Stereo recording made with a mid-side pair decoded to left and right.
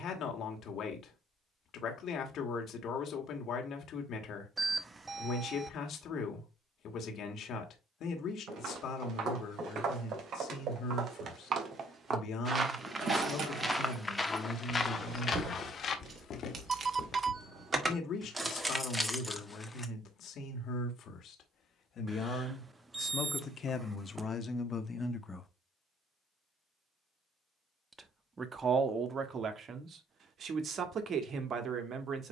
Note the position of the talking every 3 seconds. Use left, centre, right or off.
left, left, left, left, left, left, left, left, left, right, right.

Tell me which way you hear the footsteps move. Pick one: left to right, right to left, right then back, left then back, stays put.
right to left.